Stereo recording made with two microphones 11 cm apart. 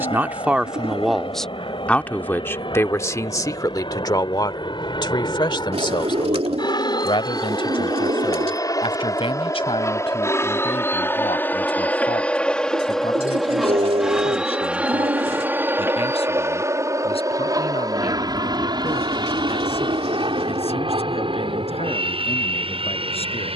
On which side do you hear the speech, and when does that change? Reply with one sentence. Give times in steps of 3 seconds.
In this clip you hear the speech in the centre from 0 s and on the left from 3 s.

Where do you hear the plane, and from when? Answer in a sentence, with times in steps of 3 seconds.
In this clip you hear the plane on the left from 0 s, in the centre from 12 s and on the right from 15 s.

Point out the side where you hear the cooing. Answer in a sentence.
In this clip you hear the cooing on the right.